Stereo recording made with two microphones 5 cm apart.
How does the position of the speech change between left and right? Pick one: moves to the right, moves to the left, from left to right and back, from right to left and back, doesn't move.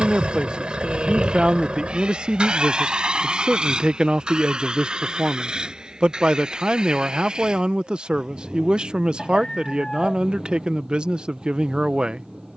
doesn't move.